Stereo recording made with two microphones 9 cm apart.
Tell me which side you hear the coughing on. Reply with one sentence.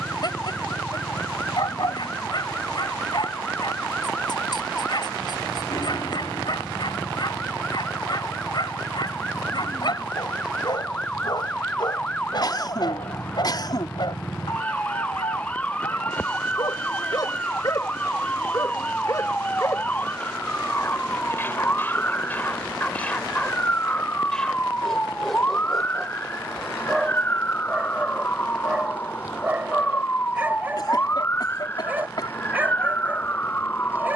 You can hear the coughing on the left.